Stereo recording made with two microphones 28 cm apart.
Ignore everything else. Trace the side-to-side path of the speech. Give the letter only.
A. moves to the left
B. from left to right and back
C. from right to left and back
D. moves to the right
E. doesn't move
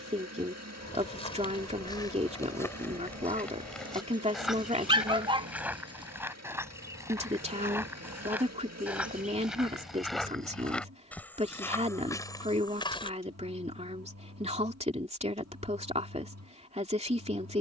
E.